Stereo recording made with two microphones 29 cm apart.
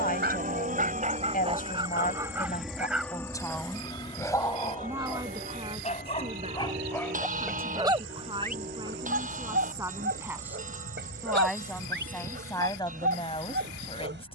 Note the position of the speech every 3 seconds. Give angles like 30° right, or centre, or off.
30° left, 10° right, 20° right, 10° right, 20° left.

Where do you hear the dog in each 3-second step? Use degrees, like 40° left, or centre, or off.
20° right, 10° left, centre, 40° right, 40° right.